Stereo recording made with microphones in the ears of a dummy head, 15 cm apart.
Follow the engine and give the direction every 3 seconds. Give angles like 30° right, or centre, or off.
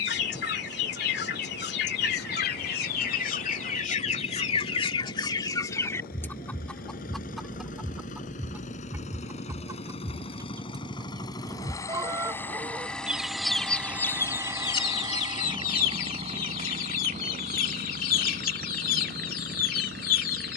60° left, 60° left, 50° left, 30° left, centre, 40° right, 60° right.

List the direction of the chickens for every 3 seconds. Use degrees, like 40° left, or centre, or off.
60° left, 40° left, centre, 20° right, centre, 50° left, 50° left.